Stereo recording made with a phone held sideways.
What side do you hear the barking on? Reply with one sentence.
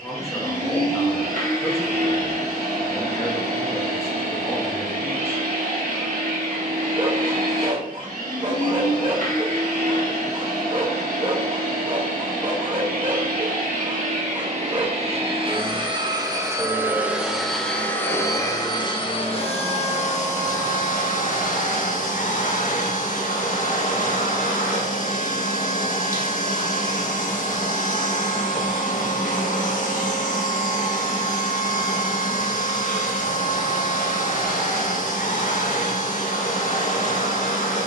You can hear the barking on the right.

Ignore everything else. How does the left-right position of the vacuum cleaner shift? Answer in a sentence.
You can hear the vacuum cleaner travel towards the left.